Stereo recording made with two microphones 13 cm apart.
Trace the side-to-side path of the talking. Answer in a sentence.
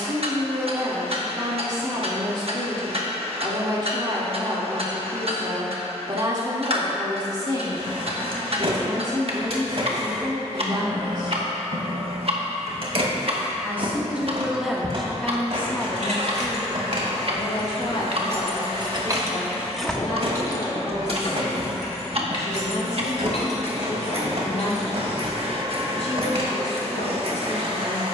You can hear the talking go from the right side to the left.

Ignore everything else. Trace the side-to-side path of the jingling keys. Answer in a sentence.
In this clip you hear the jingling keys move from right to left.